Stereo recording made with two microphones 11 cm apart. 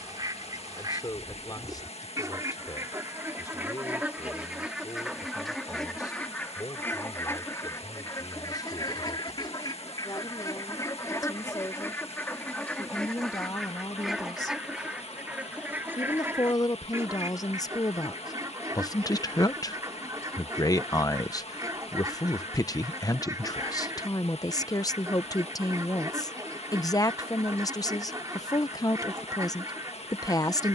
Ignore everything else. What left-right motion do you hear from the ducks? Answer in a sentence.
In this clip you hear the ducks go left and come back.